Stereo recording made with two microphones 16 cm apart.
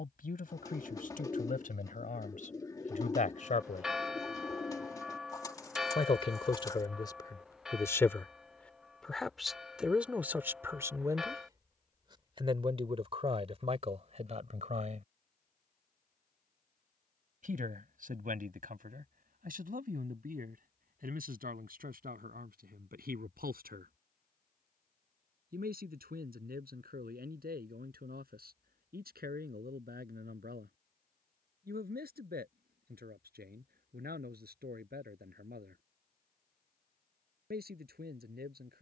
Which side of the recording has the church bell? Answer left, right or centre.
centre.